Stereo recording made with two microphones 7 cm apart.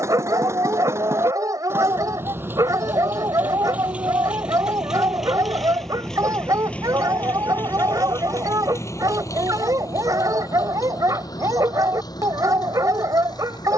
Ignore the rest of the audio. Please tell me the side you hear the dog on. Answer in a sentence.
In this clip you hear the dog on the right.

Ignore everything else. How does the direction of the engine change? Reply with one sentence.
You can hear the engine go from the right side to the left.